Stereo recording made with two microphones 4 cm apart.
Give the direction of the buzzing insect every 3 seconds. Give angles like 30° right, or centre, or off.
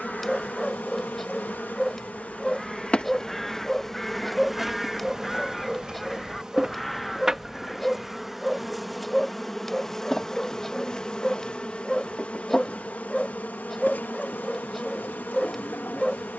40° left, centre, 10° right, 10° left, 40° left, 50° left.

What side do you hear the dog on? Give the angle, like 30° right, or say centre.
centre.